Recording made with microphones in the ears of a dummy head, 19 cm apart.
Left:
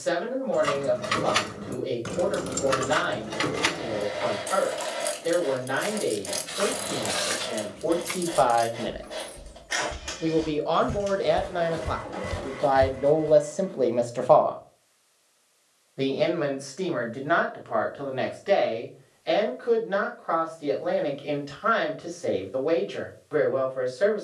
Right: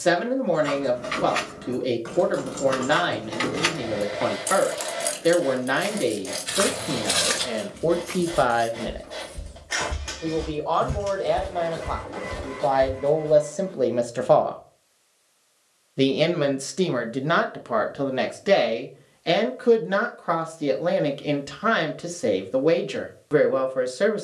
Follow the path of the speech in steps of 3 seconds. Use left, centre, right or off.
right, right, right, left, centre, right, right, right.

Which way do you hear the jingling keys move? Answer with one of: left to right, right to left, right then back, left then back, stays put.
right then back.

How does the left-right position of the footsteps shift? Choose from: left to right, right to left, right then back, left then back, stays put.
right to left.